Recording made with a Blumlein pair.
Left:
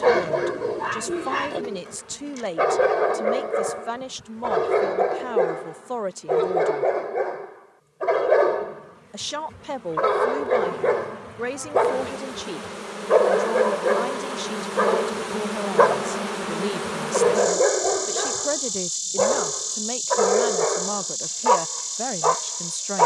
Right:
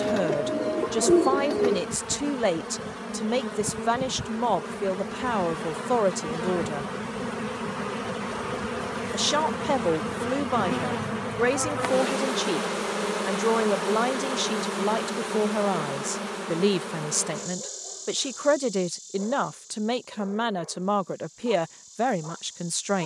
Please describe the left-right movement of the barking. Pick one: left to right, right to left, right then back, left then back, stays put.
stays put.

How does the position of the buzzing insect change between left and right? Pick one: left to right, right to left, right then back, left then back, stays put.
right to left.